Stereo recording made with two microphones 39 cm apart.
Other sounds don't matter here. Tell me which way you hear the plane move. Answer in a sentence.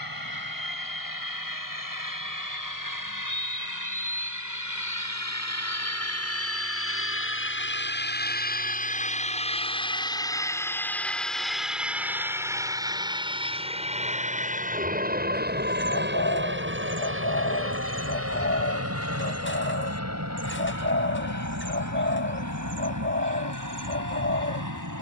In this clip you hear the plane travel towards the right.